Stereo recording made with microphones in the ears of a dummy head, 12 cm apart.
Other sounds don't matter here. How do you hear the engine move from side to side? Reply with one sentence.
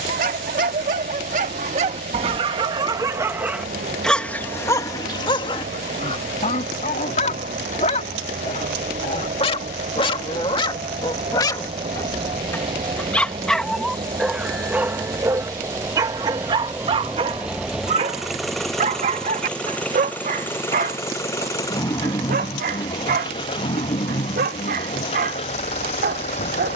In this clip you hear the engine go from the right side to the left.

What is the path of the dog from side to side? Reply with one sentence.
In this clip you hear the dog move from right to left and back again.